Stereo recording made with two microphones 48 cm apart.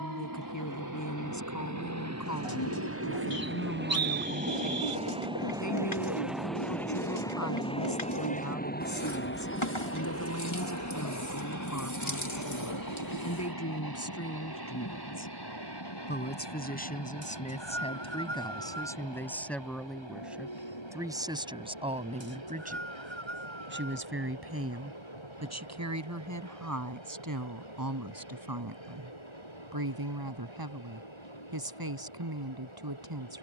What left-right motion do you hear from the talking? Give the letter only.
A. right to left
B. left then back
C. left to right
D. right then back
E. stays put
C.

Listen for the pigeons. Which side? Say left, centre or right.
left.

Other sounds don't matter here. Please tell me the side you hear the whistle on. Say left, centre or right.
right.